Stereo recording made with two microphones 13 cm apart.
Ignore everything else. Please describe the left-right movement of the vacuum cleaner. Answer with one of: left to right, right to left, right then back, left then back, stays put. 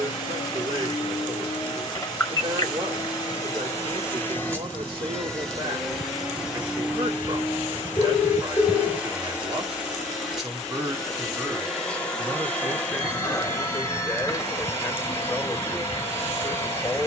right then back.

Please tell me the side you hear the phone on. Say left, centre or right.
left.